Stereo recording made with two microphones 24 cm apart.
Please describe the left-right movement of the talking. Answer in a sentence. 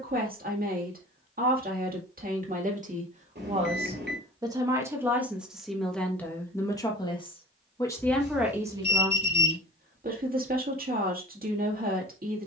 You can hear the talking move from right to left and back again.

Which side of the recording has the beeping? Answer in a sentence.
You can hear the beeping on the right.